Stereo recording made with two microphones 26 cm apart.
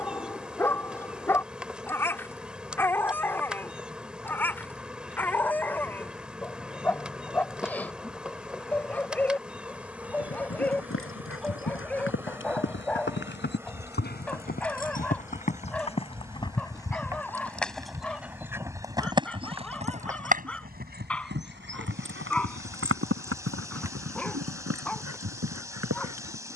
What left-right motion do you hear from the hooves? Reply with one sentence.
In this clip you hear the hooves go from the left side to the right.